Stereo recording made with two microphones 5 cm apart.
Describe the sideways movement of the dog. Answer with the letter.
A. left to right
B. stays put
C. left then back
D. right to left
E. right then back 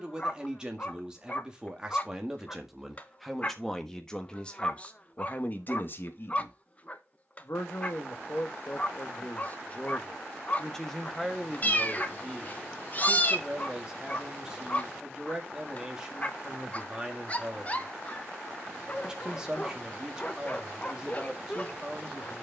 B.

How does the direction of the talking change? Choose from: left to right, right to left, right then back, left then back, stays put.
left then back.